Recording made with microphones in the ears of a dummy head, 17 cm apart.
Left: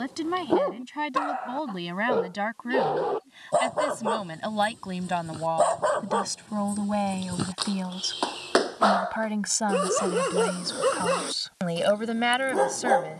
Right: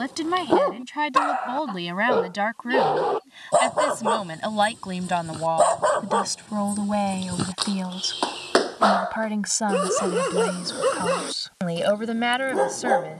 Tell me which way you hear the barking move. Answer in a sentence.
In this clip you hear the barking move to the left.